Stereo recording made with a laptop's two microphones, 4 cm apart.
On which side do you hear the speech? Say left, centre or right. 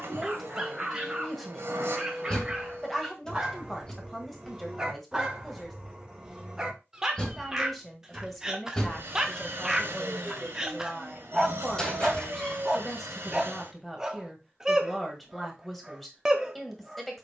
centre.